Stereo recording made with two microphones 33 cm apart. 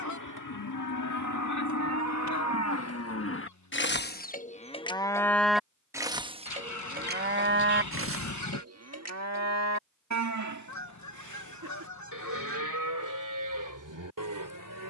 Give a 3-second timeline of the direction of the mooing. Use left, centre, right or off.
left, left, right, right, right.